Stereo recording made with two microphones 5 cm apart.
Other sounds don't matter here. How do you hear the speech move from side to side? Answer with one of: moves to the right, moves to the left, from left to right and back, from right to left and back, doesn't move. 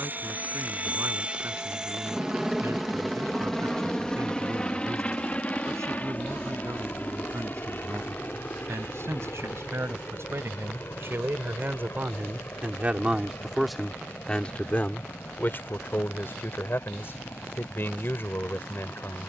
moves to the left.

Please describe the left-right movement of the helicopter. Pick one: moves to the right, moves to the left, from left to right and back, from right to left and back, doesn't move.
moves to the left.